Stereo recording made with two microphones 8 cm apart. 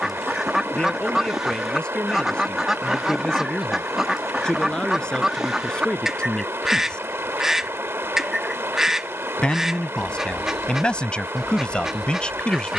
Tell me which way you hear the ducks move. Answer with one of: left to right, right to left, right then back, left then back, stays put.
stays put.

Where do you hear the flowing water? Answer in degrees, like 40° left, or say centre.
30° right.